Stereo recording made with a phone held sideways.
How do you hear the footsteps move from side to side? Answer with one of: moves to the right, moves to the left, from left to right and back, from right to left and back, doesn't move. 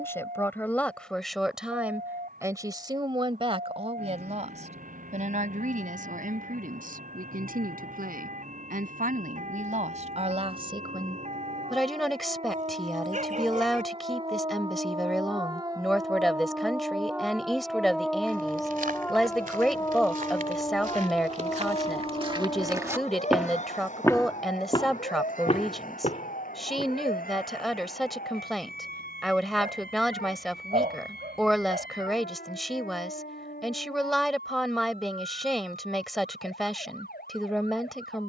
moves to the left.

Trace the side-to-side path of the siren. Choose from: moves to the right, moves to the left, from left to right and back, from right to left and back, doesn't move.
moves to the left.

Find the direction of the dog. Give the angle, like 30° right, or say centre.
50° right.